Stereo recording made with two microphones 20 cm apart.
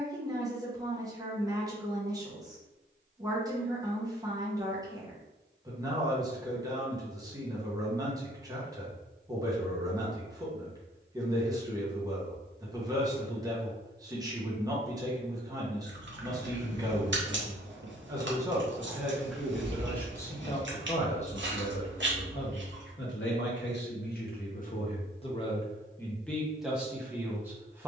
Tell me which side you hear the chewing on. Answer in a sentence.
In this clip you hear the chewing on the right.